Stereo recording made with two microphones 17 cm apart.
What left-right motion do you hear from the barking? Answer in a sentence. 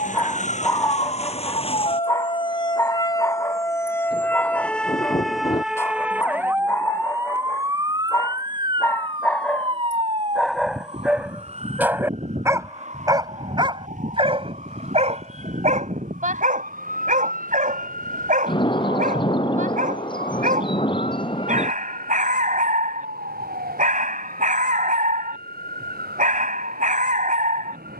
In this clip you hear the barking travel towards the right.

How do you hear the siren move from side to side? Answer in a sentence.
In this clip you hear the siren go from the left side to the right.